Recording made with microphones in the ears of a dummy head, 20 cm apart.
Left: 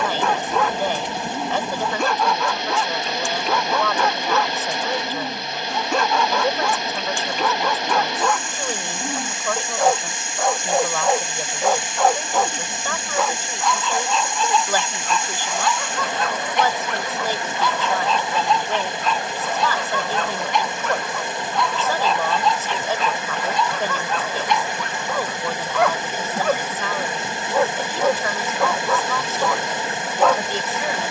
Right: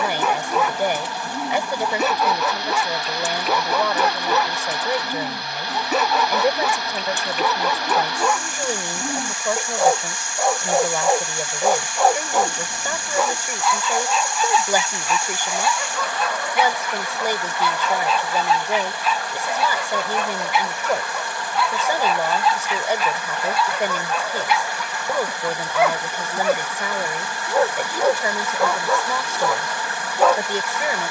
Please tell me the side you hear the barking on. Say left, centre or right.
centre.